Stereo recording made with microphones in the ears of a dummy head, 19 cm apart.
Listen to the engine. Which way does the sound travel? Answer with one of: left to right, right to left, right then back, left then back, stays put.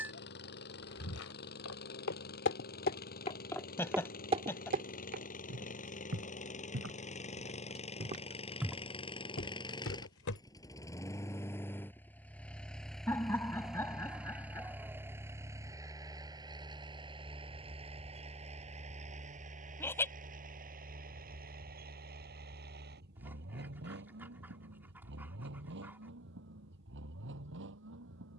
left to right.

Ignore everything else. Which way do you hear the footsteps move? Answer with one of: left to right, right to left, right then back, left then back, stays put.
right then back.